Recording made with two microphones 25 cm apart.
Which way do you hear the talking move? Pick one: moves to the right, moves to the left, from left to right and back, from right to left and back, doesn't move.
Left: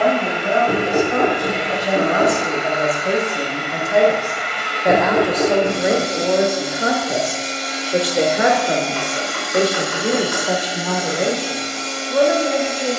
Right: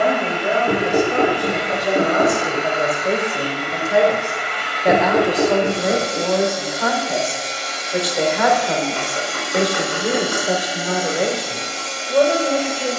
from right to left and back.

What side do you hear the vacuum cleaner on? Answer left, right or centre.
centre.